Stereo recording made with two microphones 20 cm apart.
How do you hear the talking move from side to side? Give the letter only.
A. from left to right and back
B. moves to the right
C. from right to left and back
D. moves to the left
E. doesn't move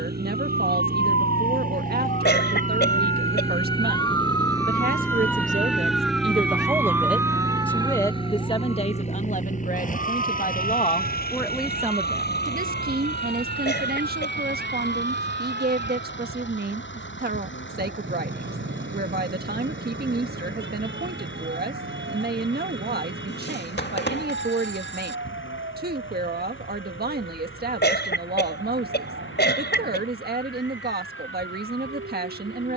C.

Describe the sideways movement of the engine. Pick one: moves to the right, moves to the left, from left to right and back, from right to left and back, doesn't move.
moves to the left.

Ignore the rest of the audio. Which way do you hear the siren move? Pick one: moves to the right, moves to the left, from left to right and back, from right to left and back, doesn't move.
moves to the right.